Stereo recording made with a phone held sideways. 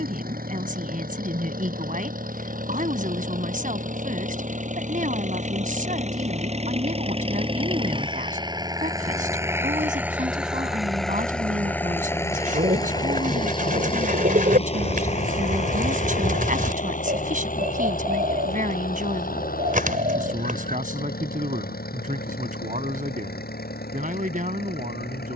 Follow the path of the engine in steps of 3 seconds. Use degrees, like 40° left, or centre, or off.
60° right, 50° right, 30° right, centre, 30° left, 50° left, 60° left, 70° left, 70° left.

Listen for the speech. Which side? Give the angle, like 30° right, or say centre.
50° right.